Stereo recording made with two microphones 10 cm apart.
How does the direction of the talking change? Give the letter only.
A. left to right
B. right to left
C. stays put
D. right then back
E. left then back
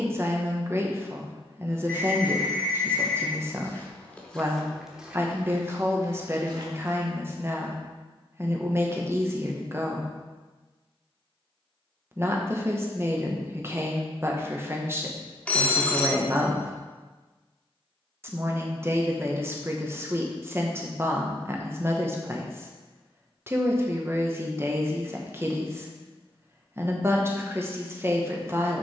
C.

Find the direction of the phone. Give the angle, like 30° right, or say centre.
10° left.